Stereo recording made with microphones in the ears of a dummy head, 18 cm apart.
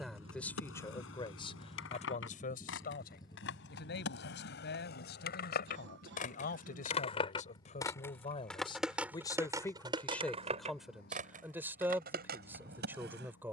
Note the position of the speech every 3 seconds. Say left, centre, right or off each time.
left, left, left, centre, centre.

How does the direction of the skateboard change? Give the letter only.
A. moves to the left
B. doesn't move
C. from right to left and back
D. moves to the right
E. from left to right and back
D.